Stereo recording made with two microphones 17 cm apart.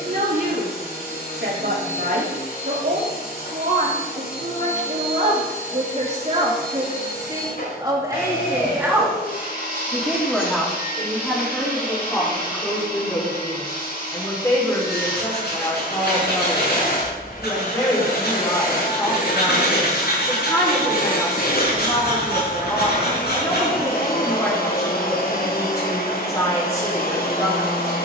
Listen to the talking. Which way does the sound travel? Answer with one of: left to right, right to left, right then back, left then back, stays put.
right to left.